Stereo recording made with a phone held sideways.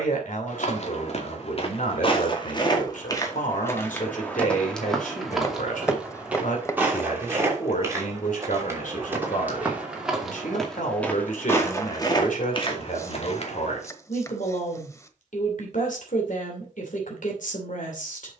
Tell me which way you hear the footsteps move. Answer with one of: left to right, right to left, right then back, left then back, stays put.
right then back.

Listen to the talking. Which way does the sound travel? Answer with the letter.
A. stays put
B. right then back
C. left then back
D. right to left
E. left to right
A.